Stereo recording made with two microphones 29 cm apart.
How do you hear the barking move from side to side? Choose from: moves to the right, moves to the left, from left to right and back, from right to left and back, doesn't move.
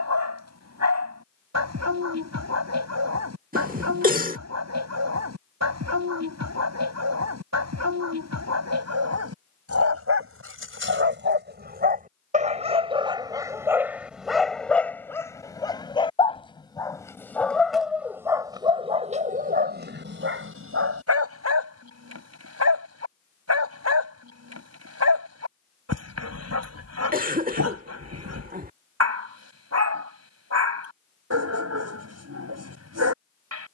from right to left and back.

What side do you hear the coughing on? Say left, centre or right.
right.